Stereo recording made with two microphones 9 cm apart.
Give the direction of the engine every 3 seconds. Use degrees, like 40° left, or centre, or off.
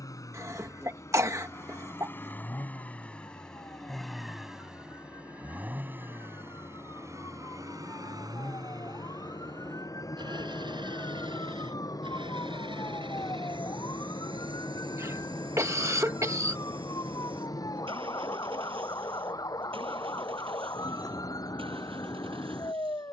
30° left, centre, 40° right, 60° right, 70° right, 70° right, 80° right, 80° right.